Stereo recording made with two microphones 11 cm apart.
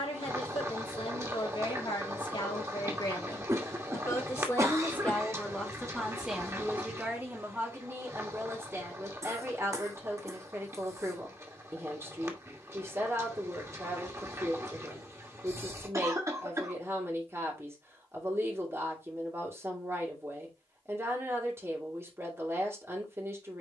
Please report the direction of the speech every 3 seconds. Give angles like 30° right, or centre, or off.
60° left, 20° left, 20° right, 20° right, 20° right, 20° right, 20° right, 20° right.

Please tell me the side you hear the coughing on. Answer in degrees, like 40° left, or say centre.
30° right.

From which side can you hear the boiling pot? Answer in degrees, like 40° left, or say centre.
30° right.